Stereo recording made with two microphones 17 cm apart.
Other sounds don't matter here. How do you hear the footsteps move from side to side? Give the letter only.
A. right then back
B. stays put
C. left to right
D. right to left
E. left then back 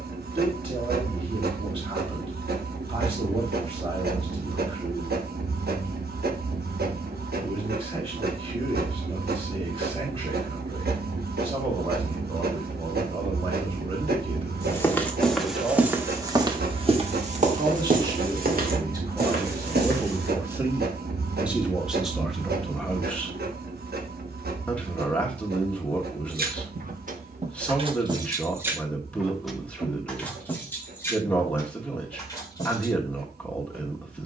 C.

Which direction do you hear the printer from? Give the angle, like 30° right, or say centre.
70° right.